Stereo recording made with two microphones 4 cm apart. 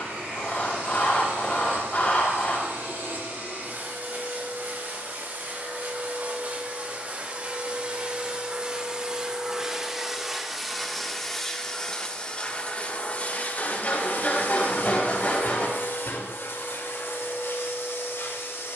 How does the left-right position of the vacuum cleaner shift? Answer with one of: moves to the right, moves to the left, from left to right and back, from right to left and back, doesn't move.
moves to the left.